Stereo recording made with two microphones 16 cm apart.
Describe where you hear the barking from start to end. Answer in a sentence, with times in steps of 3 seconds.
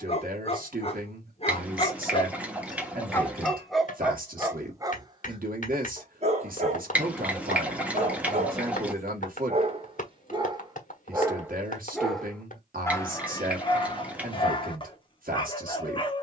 You can hear the barking on the left from 0 s, in the centre from 3 s, on the right from 6 s and on the left from 12 s.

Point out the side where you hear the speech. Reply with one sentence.
In this clip you hear the speech on the right.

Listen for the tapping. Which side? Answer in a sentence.
You can hear the tapping on the left.